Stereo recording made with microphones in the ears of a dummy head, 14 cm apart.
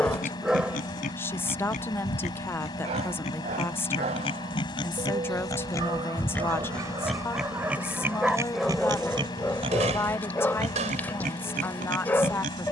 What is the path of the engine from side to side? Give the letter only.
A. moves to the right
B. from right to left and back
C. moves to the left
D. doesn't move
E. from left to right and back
D.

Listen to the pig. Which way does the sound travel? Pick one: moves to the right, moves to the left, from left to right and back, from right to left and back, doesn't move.
moves to the right.